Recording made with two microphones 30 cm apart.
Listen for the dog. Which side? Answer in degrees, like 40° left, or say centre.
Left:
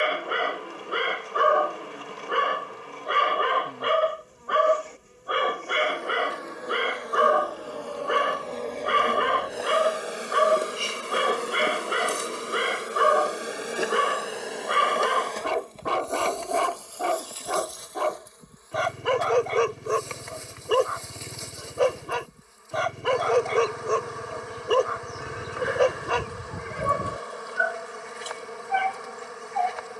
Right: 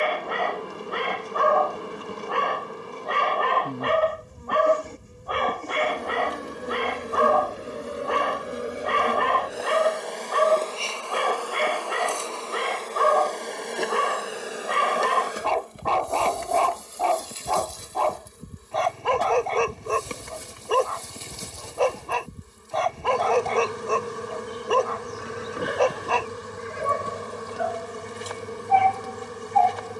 20° left.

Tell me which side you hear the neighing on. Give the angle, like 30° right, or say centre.
60° left.